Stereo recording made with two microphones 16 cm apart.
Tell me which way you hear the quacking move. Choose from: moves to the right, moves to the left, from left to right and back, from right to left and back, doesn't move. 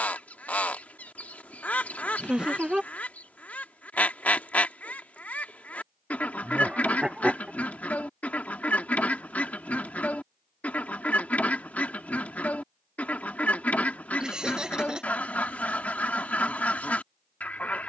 doesn't move.